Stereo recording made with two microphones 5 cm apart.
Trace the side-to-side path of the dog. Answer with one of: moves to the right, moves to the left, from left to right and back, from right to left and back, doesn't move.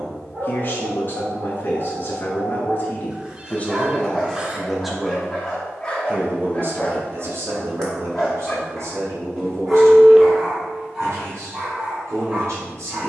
from right to left and back.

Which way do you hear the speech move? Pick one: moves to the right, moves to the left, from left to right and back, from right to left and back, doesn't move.
moves to the right.